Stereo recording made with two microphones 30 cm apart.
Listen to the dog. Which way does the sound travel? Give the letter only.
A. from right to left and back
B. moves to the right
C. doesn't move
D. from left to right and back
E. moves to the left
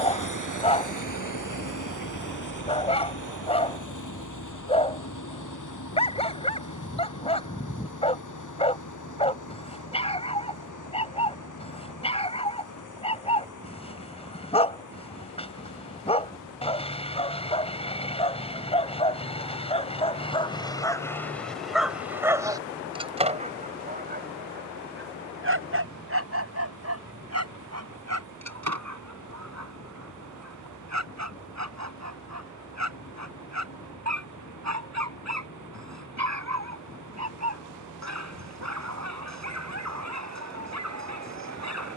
B.